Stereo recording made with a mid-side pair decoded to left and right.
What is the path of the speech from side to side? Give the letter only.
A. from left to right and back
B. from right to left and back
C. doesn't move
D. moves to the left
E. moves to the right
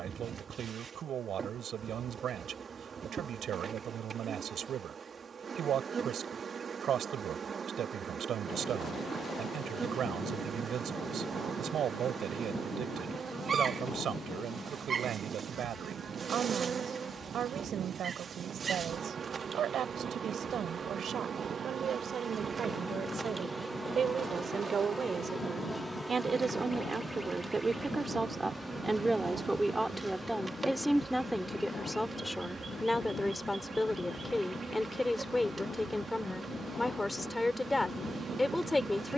D.